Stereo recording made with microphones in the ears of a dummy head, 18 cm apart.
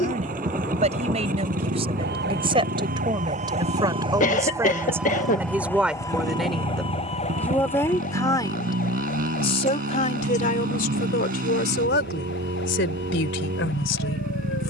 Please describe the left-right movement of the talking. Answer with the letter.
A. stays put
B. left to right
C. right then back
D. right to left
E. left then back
D.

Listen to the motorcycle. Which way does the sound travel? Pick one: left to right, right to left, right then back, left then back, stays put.
stays put.